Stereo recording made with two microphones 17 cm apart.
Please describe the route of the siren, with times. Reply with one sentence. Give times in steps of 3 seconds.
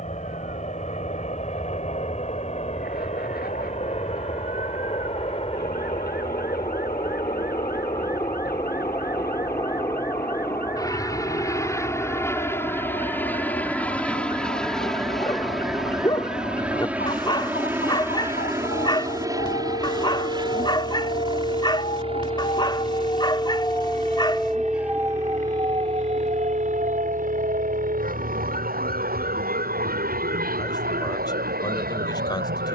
In this clip you hear the siren on the left from 0 s and on the right from 24 s.